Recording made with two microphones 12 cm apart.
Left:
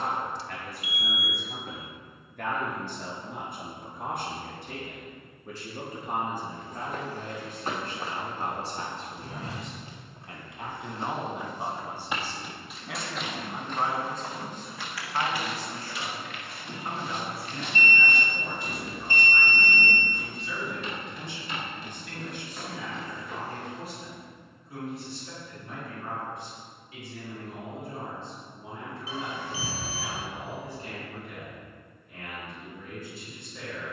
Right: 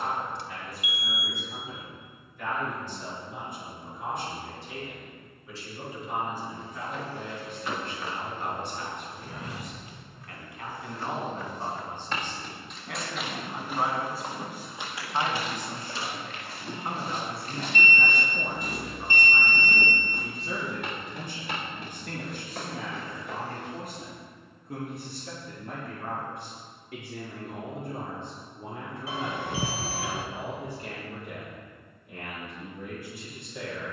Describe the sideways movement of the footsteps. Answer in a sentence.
In this clip you hear the footsteps move to the right.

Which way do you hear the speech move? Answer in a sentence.
In this clip you hear the speech move from left to right.